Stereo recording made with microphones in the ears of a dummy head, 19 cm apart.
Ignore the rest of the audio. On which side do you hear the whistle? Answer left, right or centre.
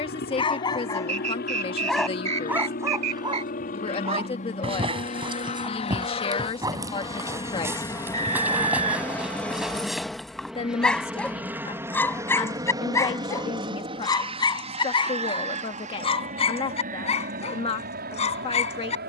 right.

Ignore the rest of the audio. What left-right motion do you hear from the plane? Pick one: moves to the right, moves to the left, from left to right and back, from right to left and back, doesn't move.
moves to the right.